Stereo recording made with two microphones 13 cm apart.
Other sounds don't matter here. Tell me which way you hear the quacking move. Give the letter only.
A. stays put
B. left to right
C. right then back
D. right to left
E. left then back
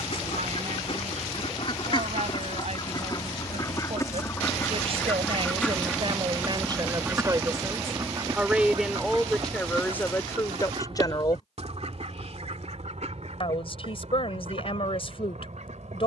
B.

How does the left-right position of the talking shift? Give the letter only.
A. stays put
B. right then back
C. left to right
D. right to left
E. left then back
D.